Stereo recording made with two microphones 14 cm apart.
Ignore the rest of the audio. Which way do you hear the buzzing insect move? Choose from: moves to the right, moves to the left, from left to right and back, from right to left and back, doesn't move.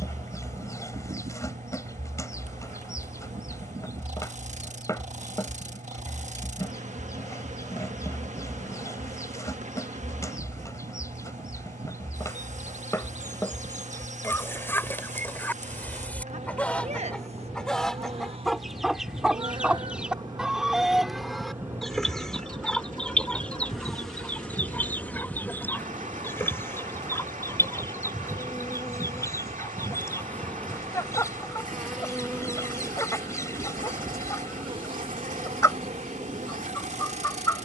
from right to left and back.